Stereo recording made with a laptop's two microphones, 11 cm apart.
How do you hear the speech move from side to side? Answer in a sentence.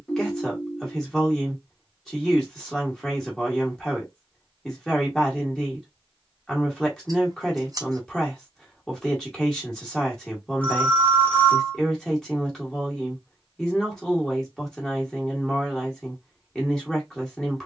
You can hear the speech stay put.